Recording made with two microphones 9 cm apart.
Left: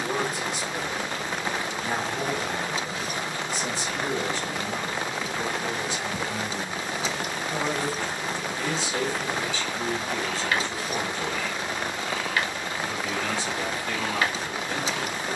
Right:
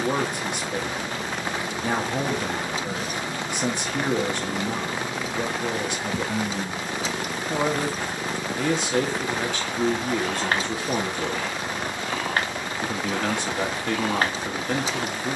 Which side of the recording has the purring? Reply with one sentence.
You can hear the purring on the right.